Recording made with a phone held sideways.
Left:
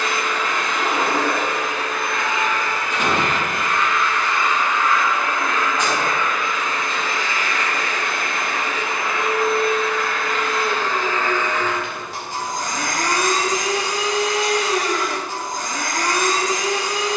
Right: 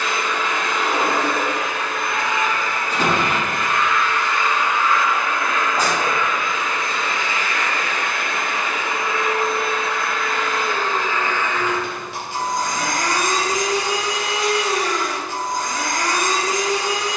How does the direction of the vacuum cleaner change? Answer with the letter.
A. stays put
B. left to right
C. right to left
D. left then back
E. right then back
A.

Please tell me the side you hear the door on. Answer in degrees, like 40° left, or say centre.
30° right.